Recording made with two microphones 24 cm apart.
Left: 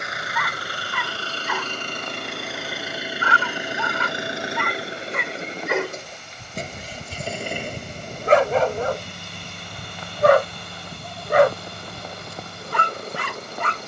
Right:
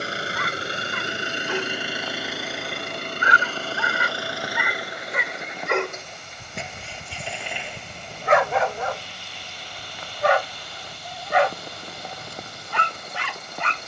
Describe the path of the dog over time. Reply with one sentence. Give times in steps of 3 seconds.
You can hear the dog on the right from 0 s, in the centre from 3 s and on the left from 6 s.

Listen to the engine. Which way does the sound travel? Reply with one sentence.
You can hear the engine go from the right side to the left.